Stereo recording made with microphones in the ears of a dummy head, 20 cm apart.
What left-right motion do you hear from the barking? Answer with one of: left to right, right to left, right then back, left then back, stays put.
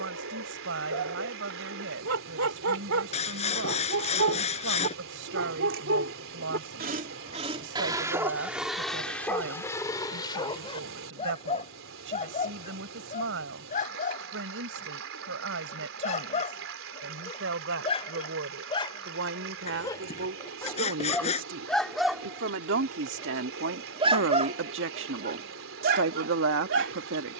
left then back.